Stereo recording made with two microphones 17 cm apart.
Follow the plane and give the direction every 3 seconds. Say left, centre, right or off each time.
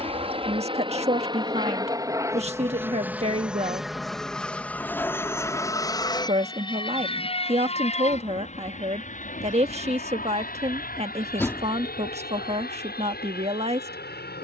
right, centre, left, left, left.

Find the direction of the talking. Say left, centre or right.
right.